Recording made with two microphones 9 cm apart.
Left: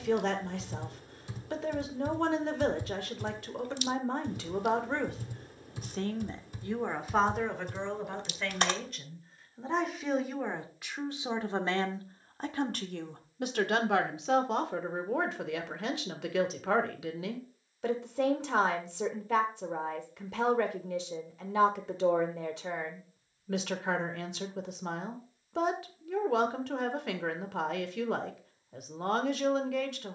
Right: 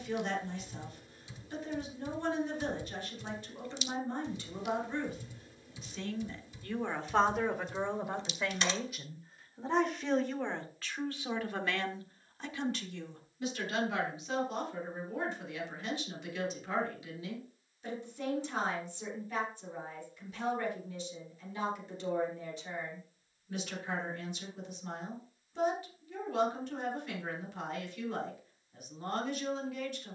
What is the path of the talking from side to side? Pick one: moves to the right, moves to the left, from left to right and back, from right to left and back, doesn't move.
from left to right and back.